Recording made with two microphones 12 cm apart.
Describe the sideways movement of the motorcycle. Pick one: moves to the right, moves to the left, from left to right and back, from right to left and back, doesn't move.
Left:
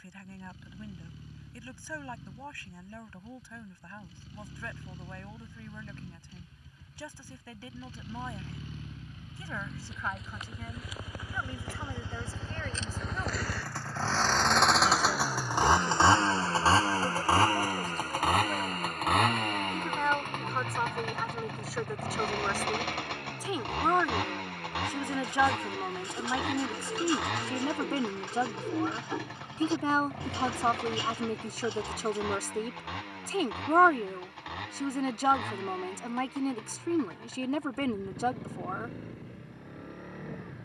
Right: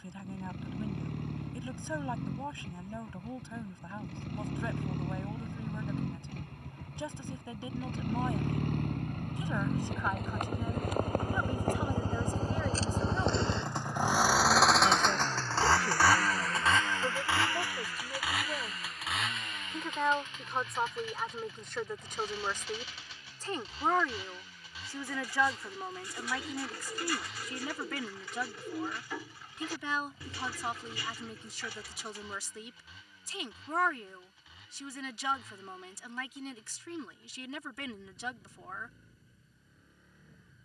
moves to the left.